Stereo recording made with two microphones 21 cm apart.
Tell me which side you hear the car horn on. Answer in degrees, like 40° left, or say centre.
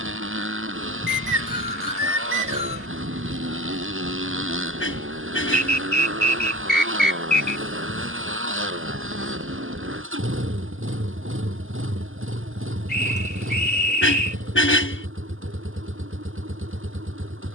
70° left.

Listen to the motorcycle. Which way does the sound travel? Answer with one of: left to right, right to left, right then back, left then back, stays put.
stays put.